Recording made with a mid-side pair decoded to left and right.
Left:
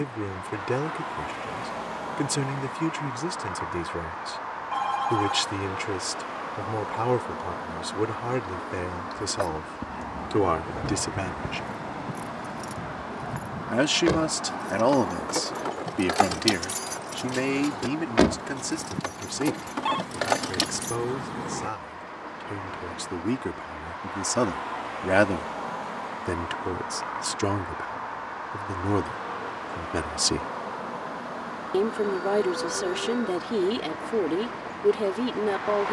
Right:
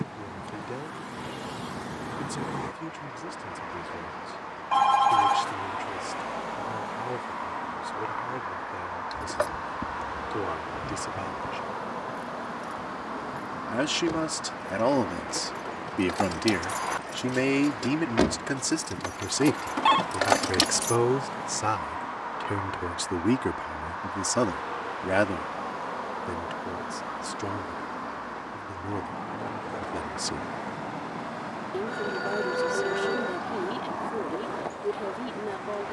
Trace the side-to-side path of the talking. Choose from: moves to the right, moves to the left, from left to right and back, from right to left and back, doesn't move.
from left to right and back.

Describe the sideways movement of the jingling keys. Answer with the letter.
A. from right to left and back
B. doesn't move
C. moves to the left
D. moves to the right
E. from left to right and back
A.